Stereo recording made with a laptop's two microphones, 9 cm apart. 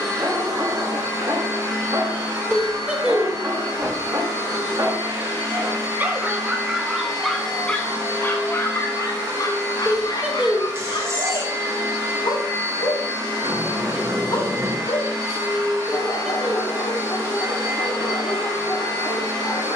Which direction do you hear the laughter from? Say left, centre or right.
centre.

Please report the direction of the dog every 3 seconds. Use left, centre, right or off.
right, right, centre, left, left, left, left.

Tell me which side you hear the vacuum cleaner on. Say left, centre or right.
right.